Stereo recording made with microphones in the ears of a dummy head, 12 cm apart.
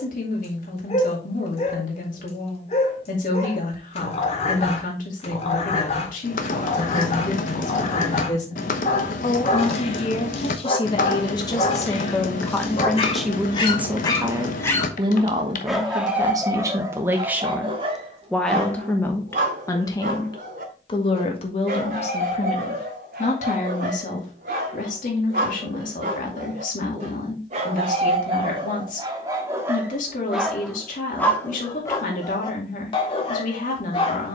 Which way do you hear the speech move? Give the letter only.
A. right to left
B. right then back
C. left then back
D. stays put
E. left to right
B.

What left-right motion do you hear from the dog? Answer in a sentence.
In this clip you hear the dog go right and come back.